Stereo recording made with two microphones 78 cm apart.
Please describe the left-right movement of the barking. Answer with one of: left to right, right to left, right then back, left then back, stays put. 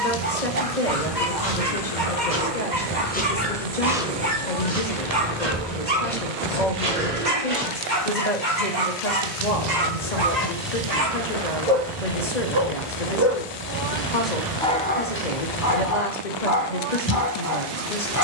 right to left.